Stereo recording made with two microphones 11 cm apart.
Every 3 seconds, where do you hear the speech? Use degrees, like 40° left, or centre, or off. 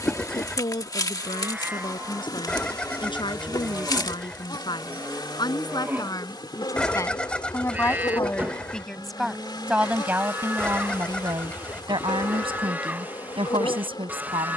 50° left, 40° left, 20° left, 20° right, 50° right.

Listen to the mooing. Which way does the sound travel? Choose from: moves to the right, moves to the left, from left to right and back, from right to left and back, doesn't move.
doesn't move.